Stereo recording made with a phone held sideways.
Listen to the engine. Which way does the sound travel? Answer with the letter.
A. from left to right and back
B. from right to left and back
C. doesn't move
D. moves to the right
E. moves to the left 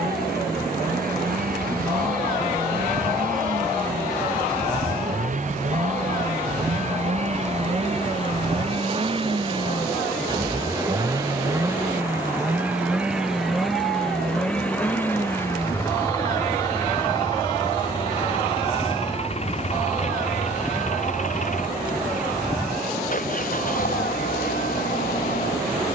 E.